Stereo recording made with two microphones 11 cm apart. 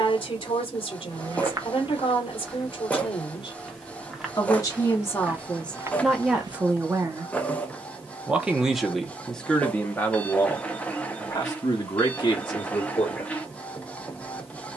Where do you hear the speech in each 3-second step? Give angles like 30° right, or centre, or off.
50° left, 30° left, 10° right, 20° left, 40° left.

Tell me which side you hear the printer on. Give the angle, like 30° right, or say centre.
10° left.